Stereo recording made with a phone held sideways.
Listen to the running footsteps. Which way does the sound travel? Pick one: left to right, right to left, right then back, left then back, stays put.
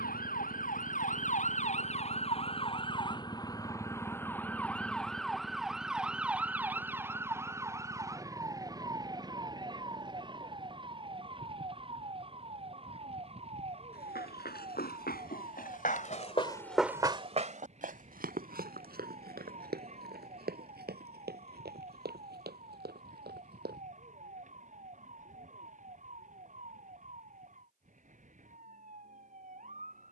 left to right.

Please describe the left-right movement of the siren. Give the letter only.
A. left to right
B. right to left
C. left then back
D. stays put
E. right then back
A.